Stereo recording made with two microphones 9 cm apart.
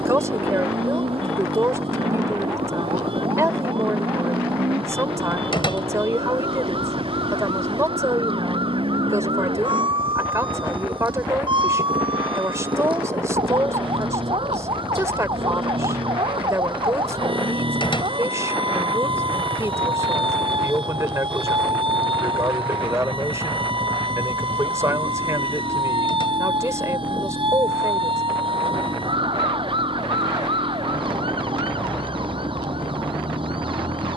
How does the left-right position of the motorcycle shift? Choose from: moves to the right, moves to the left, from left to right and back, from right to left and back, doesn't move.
doesn't move.